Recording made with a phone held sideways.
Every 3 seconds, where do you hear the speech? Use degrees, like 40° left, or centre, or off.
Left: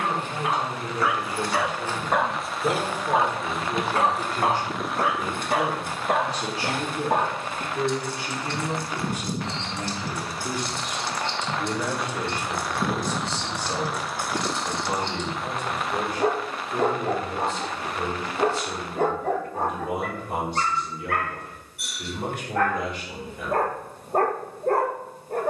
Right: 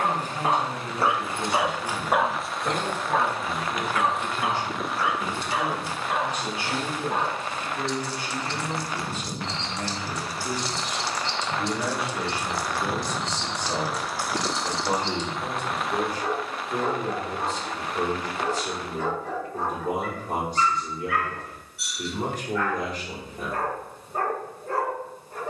50° left, 40° left, 30° left, centre, 20° right, 40° right, 40° right, 40° right, off.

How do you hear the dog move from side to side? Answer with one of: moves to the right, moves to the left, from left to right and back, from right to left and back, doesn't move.
moves to the left.